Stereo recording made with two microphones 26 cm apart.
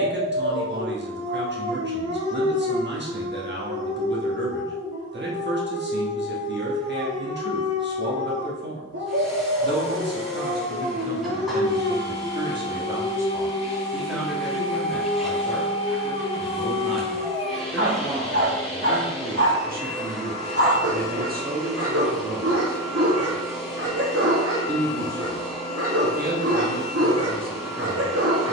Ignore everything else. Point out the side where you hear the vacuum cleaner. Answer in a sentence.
You can hear the vacuum cleaner in the centre.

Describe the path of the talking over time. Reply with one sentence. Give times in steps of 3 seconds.
You can hear the talking on the right from 0 s, in the centre from 12 s and on the right from 18 s.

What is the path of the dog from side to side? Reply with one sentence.
In this clip you hear the dog stay in one place.